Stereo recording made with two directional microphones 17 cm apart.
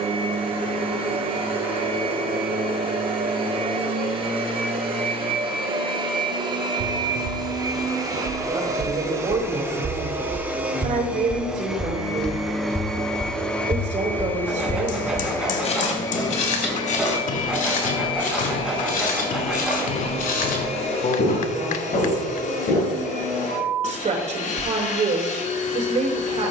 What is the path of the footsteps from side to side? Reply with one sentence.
You can hear the footsteps go from the right side to the left.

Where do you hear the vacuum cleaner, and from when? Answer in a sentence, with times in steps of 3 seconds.
In this clip you hear the vacuum cleaner on the right from 0 s, in the centre from 9 s and on the left from 15 s.